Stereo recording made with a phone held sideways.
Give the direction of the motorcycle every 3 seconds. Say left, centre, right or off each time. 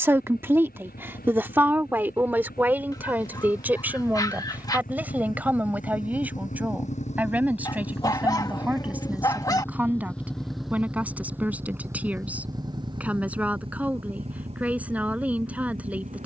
left, left, left, centre, right, right.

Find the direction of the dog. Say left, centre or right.
left.